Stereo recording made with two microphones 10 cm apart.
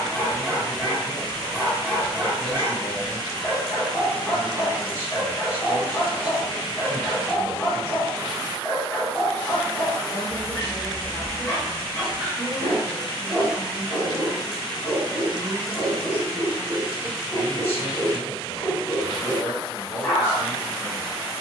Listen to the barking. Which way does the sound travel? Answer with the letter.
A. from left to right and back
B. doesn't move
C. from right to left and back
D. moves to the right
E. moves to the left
B.